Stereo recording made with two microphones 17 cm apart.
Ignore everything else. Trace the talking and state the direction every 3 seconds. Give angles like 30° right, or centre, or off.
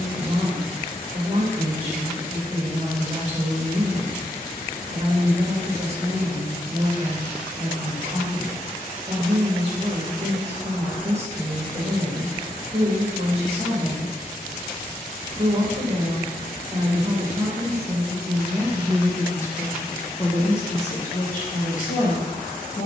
40° right, 40° right, 40° right, 40° right, 40° right, 30° right, 20° left, 50° left.